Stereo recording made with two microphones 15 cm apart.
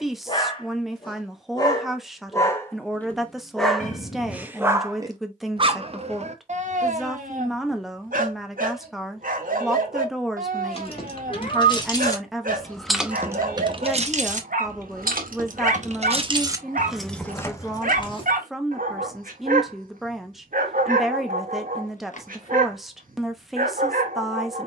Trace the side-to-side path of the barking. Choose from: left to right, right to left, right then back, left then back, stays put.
left to right.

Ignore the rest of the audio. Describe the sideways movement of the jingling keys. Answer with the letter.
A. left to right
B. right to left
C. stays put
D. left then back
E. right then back
E.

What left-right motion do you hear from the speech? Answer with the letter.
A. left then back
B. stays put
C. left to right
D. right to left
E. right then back
B.